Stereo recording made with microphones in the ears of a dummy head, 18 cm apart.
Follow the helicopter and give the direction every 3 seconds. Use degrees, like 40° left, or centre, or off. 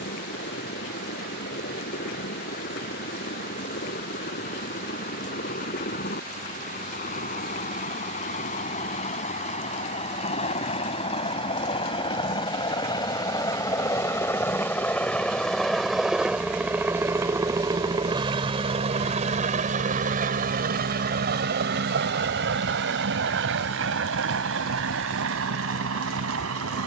50° left, 50° left, 40° left, 30° left, 20° left, 10° right, 40° right, 60° right, 70° right.